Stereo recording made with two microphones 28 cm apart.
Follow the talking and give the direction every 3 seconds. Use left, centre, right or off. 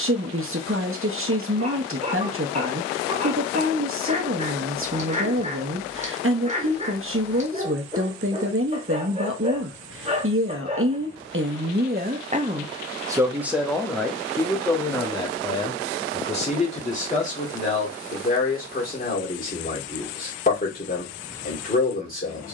right, right, right, right, centre, left, left, left.